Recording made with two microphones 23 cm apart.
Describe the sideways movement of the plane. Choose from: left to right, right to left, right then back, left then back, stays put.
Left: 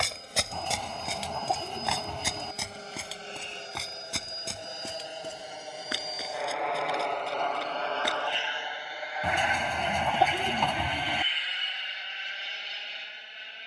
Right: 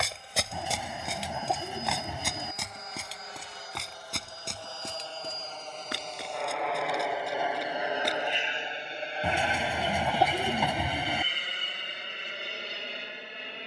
left to right.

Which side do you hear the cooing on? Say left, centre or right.
centre.